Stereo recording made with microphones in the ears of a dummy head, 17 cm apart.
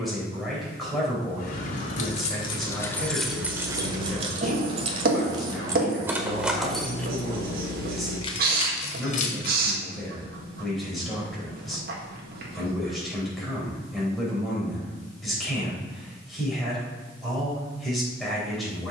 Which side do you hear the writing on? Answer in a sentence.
In this clip you hear the writing on the right.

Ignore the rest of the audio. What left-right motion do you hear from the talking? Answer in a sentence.
In this clip you hear the talking stay put.